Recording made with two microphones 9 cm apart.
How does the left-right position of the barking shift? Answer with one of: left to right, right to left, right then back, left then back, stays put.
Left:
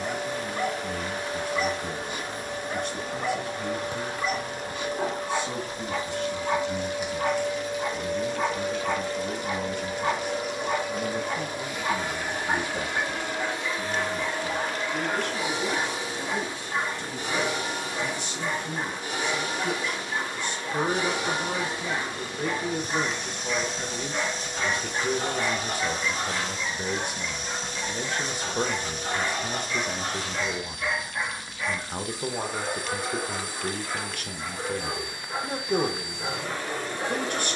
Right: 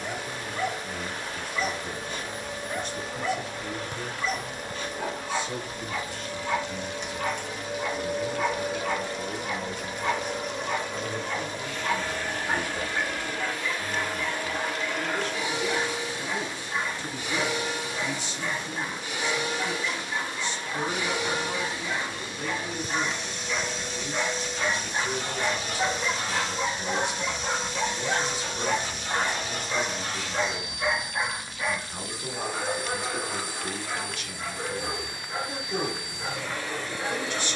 right then back.